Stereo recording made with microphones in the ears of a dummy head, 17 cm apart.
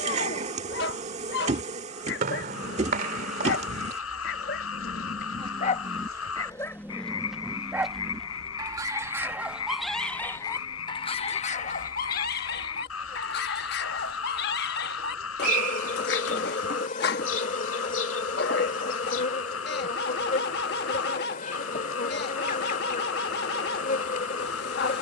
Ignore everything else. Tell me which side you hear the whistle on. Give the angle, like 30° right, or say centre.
50° right.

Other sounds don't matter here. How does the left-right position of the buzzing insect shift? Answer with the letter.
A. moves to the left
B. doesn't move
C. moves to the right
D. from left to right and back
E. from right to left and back
A.